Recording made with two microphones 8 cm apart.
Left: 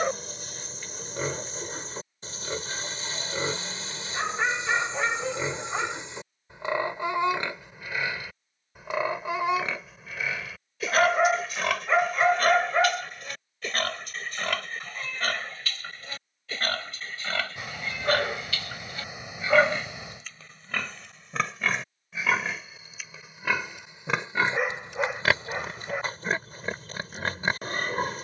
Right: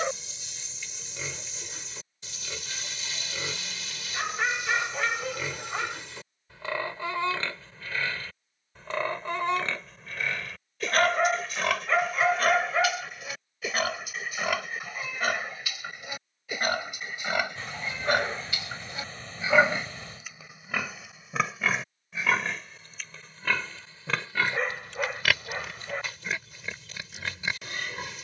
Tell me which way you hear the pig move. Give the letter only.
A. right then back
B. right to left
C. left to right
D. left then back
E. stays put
A.